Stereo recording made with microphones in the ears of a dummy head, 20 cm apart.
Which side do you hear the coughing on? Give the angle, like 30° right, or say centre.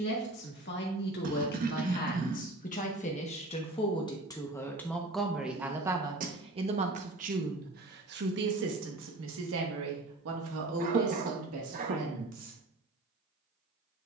40° right.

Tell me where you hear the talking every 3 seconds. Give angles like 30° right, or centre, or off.
50° left, 10° left, 40° right, 70° right, 80° right.